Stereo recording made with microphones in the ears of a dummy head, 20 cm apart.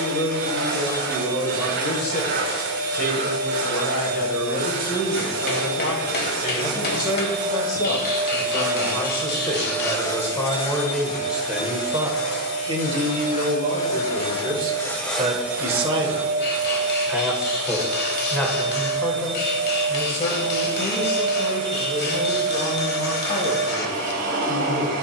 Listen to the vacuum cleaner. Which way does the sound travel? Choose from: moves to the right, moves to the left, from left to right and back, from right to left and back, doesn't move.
from right to left and back.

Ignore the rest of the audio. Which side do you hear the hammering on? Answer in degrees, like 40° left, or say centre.
40° left.